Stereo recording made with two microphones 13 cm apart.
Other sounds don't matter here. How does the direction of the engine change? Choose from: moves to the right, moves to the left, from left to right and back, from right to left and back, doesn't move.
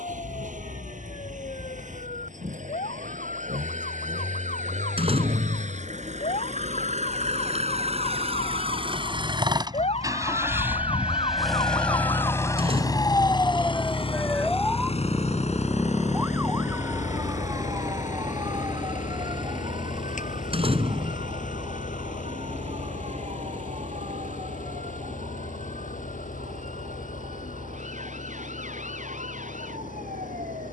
moves to the left.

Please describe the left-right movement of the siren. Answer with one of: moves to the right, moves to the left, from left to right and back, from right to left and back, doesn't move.
moves to the right.